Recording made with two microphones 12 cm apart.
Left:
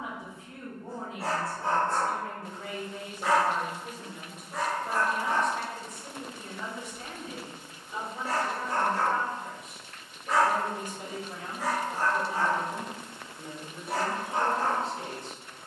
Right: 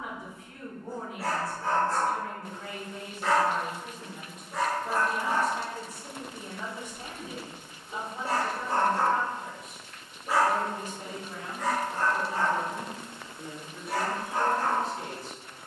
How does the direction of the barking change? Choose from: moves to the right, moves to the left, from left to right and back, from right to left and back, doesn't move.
from left to right and back.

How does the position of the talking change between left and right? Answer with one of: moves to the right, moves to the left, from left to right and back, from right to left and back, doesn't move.
from left to right and back.